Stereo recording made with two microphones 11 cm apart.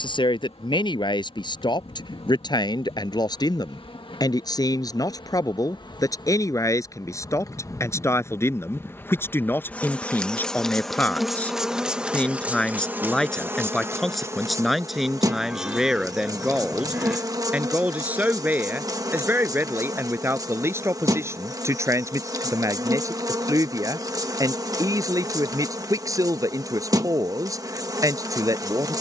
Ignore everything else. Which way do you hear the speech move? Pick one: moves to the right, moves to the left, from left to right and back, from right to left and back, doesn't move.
moves to the right.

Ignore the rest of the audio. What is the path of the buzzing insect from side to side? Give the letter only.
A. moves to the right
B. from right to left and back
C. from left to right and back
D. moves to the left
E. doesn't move
A.